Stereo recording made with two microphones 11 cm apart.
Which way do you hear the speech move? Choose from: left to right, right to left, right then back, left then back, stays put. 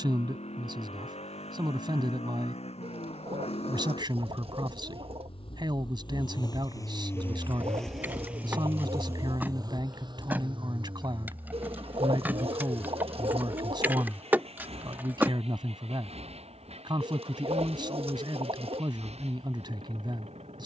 stays put.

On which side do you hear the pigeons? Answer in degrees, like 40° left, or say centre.
60° right.